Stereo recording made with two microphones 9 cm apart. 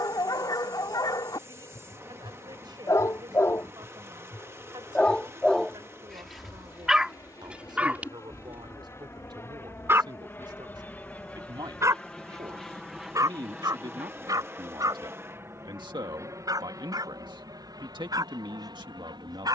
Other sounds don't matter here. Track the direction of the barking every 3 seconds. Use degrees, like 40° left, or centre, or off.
50° left, 20° left, 20° right, 40° right, 50° right, 50° right, 60° right.